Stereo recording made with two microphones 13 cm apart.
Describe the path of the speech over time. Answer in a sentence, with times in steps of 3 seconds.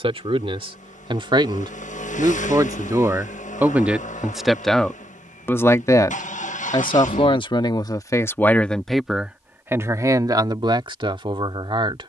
You can hear the speech on the right from 0 s, in the centre from 3 s, on the left from 6 s and on the right from 9 s.